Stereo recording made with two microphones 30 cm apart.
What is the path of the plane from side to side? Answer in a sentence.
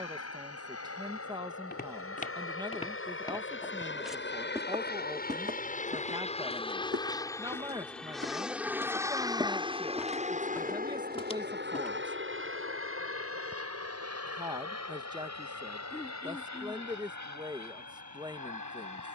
You can hear the plane move to the right.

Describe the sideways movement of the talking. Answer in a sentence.
You can hear the talking stay put.